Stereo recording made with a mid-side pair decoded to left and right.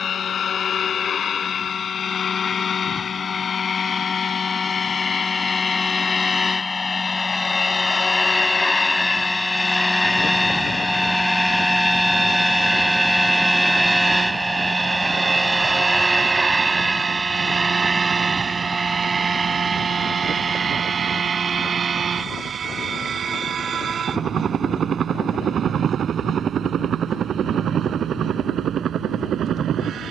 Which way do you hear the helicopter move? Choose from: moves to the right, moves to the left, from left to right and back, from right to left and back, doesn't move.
moves to the right.